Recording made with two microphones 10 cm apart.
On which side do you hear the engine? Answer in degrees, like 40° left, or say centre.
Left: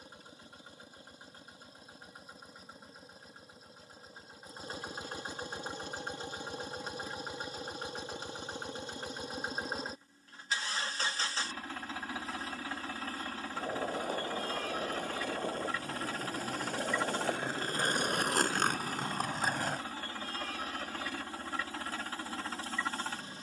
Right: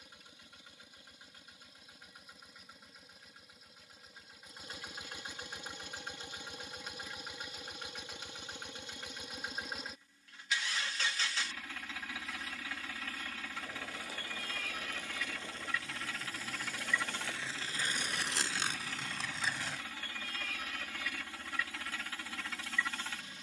40° left.